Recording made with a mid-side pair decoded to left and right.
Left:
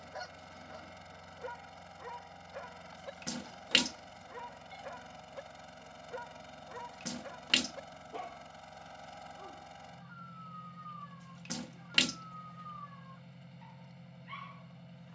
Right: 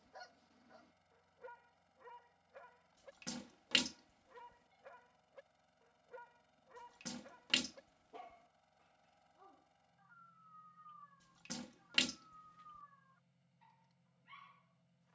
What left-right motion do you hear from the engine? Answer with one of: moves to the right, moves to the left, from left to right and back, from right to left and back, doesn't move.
doesn't move.